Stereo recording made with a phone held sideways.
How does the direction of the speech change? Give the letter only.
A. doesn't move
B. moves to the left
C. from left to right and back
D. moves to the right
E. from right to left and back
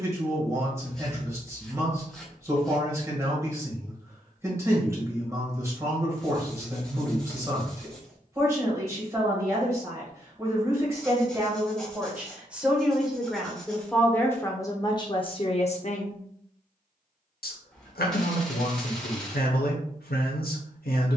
B.